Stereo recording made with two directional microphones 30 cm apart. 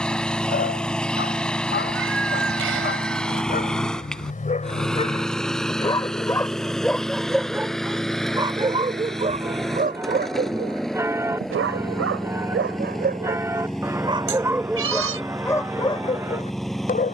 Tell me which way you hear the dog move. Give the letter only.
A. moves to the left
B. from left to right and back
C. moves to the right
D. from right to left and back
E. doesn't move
B.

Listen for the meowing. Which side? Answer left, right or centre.
right.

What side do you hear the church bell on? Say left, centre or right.
centre.